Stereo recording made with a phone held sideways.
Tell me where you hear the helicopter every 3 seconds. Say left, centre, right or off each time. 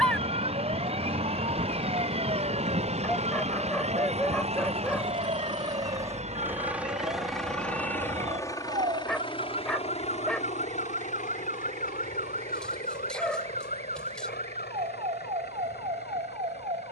right, right, centre, left, left, left.